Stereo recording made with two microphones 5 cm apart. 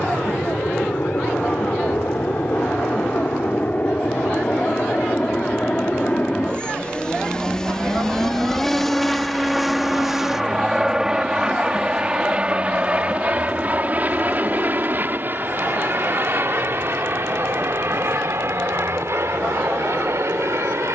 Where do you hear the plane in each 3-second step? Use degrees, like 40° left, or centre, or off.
40° left, 30° left, 10° left, 10° right, 30° right, 40° right, 60° right.